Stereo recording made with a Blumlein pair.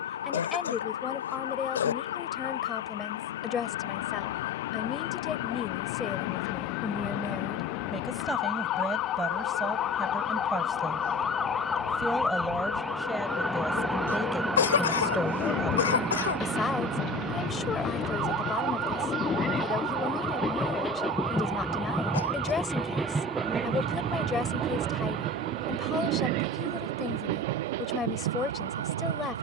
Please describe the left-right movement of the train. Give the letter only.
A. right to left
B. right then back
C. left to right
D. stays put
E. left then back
C.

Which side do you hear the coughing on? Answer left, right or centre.
left.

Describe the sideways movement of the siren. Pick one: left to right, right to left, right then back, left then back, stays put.
left to right.